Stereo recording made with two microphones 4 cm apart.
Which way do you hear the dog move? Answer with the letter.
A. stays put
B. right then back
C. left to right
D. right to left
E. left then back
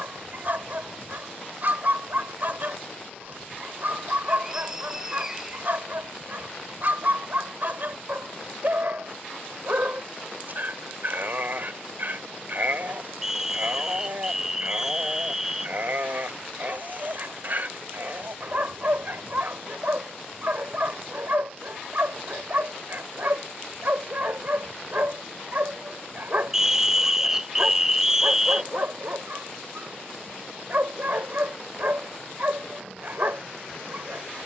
A.